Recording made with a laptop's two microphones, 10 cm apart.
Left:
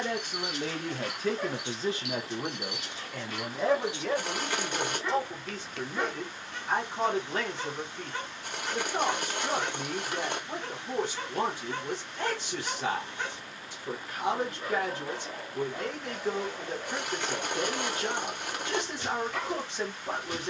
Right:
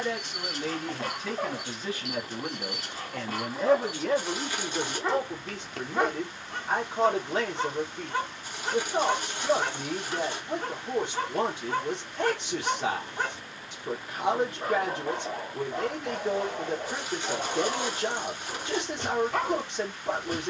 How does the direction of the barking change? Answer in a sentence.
You can hear the barking stay in one place.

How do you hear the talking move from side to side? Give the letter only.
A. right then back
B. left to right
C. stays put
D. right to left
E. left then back
B.